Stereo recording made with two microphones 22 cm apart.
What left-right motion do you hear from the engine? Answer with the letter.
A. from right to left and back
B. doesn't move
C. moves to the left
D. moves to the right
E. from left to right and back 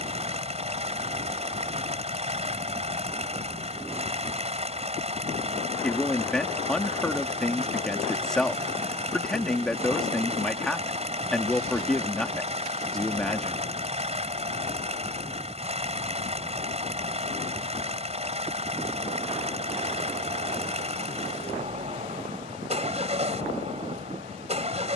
B.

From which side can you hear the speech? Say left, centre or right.
centre.